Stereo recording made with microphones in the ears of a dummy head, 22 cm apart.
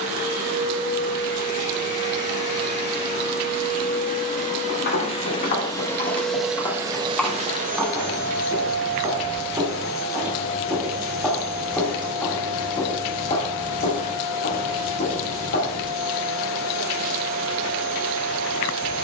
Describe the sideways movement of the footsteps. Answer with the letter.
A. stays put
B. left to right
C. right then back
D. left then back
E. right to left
C.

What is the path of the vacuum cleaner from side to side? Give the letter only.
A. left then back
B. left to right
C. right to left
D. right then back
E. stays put
B.